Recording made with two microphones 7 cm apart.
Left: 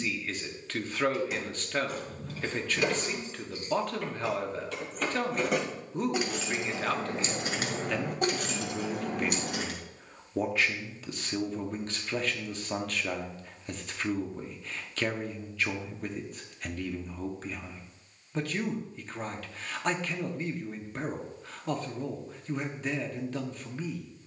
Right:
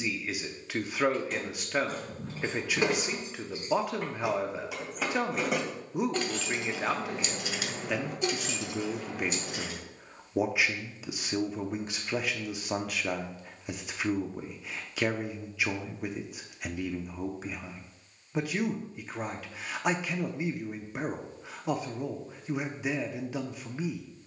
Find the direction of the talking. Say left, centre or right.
centre.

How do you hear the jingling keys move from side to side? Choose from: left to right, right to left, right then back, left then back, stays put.
right to left.